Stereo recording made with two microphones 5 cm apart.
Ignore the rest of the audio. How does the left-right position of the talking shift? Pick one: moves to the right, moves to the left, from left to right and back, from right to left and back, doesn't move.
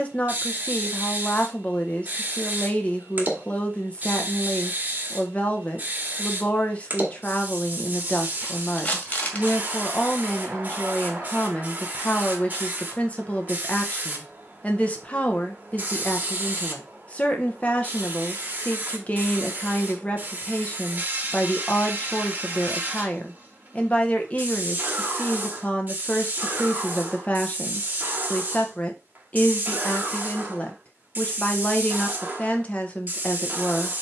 doesn't move.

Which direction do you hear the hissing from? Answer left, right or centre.
right.